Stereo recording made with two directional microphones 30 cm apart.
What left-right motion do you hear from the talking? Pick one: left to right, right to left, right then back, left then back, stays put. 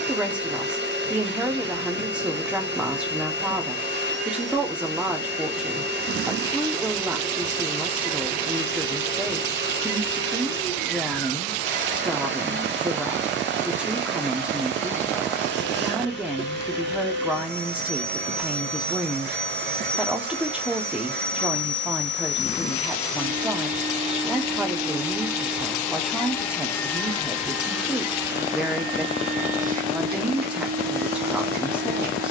stays put.